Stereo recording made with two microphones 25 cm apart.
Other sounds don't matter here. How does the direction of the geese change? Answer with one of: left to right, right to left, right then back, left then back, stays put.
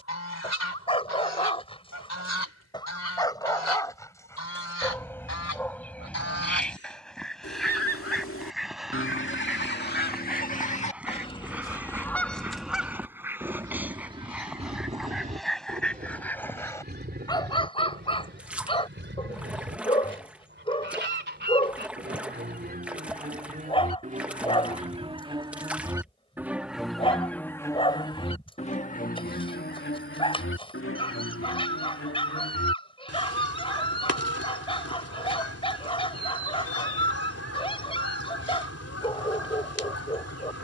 right then back.